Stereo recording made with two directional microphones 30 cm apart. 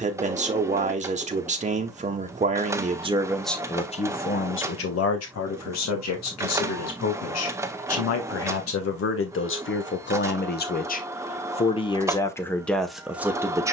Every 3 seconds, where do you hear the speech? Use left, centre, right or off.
right, left, left, left, centre.